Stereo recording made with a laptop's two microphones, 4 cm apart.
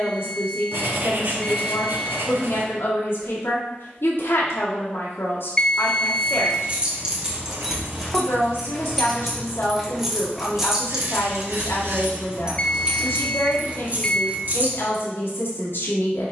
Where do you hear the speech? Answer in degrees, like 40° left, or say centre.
70° left.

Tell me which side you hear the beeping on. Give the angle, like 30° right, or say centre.
20° left.